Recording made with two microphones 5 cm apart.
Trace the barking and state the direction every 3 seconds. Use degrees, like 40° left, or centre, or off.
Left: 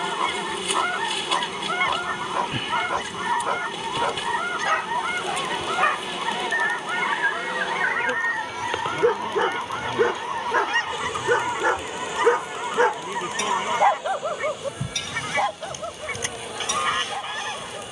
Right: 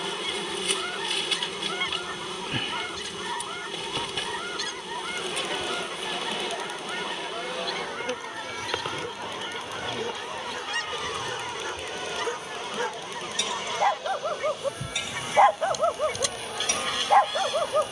80° left, 80° left, 70° left, 60° left, 20° left, 50° right.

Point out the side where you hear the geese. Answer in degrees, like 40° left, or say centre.
30° left.